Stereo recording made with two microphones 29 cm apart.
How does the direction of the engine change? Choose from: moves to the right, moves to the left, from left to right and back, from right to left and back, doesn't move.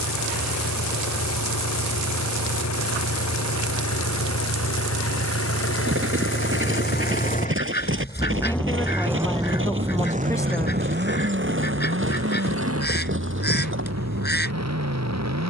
moves to the right.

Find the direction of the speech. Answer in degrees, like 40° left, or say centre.
10° left.